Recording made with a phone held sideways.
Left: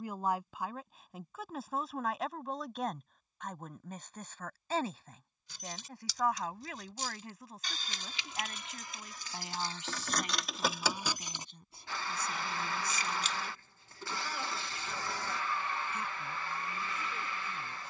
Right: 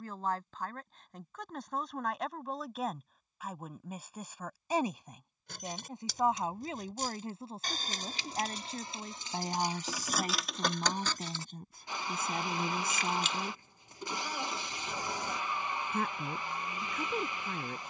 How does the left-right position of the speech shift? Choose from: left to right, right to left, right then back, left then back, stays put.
left to right.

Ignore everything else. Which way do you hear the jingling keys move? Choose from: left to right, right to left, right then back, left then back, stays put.
right to left.